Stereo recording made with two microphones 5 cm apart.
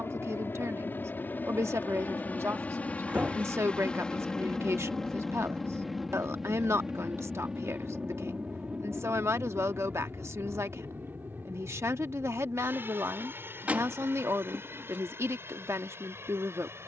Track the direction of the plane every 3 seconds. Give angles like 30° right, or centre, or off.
40° left, 10° left, 10° right, 30° right, 40° right, 50° right.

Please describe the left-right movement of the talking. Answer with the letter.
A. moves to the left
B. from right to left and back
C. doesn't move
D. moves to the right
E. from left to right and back
C.